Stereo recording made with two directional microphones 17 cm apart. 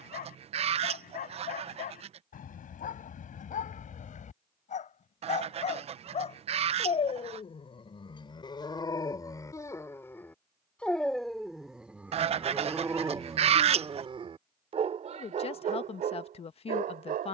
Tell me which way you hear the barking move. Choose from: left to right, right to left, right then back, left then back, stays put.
left to right.